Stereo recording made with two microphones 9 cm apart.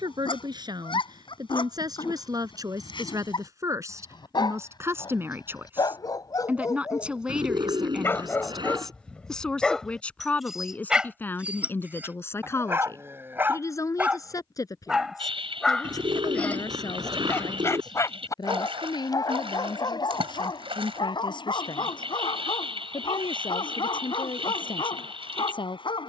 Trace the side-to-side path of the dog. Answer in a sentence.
In this clip you hear the dog go right and come back.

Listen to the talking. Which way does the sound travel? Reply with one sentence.
In this clip you hear the talking move from right to left.